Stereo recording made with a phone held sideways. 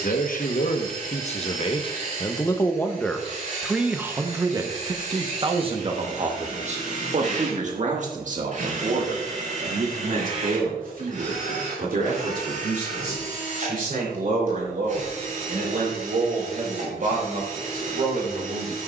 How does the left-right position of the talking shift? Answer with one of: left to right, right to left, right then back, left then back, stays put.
left to right.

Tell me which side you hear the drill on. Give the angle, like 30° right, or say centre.
50° right.